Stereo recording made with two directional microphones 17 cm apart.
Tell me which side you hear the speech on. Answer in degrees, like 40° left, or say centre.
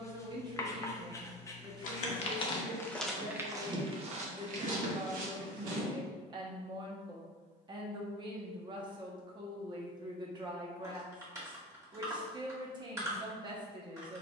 30° right.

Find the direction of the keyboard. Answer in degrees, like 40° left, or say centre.
20° right.